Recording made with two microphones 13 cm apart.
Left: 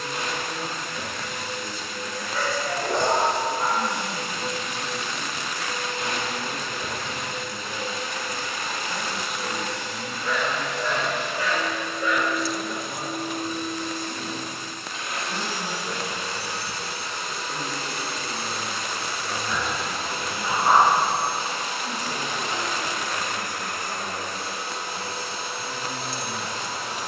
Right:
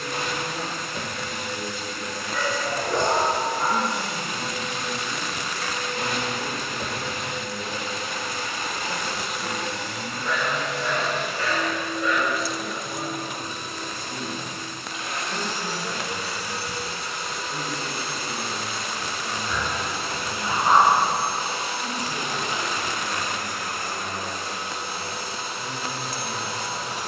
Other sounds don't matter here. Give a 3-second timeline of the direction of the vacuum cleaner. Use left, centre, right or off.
right, right, right, right, right, left, left, left, left.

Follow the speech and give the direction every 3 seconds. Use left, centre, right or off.
right, right, right, centre, left, left, left, left, left.